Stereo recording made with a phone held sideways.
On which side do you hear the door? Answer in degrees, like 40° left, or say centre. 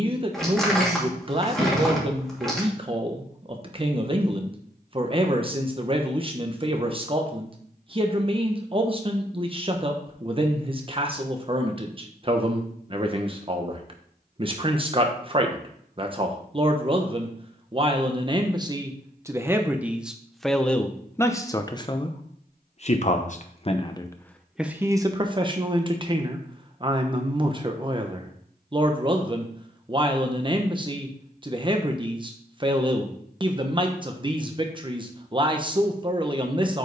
centre.